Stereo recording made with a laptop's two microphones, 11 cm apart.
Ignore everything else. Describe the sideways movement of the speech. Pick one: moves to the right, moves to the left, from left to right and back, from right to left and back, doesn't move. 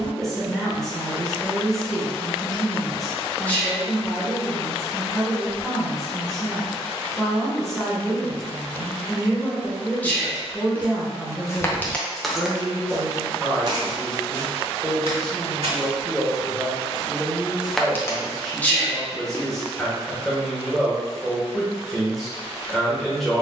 doesn't move.